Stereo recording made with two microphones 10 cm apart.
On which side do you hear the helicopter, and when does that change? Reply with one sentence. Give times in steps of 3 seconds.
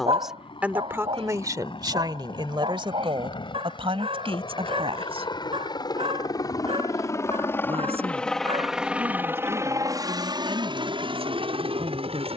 You can hear the helicopter on the left from 0 s and on the right from 9 s.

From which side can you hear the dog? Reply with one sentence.
In this clip you hear the dog on the right.